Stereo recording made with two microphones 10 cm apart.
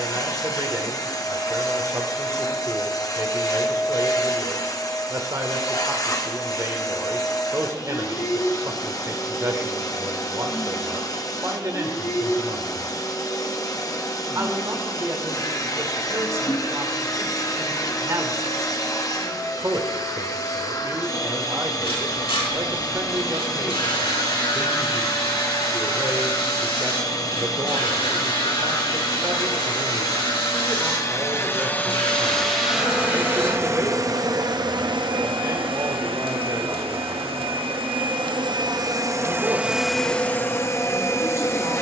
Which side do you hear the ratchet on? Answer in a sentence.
You can hear the ratchet on the left.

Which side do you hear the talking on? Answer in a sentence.
In this clip you hear the talking on the right.